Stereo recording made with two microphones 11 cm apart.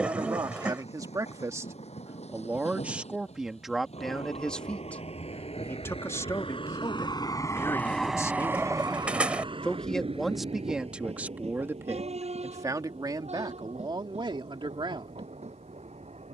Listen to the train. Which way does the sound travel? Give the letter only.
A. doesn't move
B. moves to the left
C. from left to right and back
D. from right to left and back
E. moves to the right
E.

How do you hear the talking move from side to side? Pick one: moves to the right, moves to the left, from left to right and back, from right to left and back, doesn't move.
from right to left and back.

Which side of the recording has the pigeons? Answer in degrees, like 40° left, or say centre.
10° right.